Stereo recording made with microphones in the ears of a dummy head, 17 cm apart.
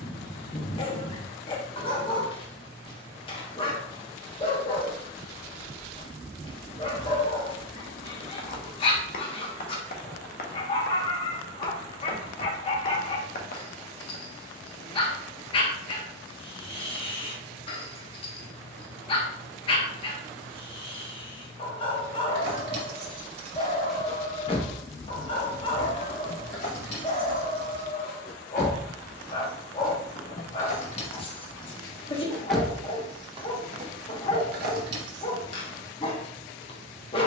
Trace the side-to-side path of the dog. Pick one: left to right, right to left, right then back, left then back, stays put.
stays put.